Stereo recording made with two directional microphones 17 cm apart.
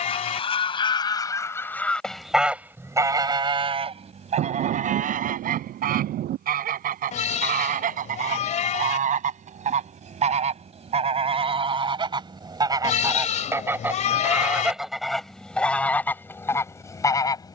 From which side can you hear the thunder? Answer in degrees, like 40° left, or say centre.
70° right.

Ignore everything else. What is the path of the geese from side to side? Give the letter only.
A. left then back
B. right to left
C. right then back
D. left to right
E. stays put
C.